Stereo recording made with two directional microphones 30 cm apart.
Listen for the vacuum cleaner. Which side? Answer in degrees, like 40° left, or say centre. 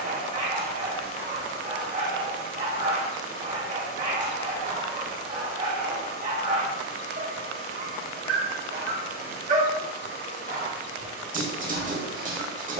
50° right.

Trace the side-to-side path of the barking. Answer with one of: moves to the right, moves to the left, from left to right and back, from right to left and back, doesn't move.
doesn't move.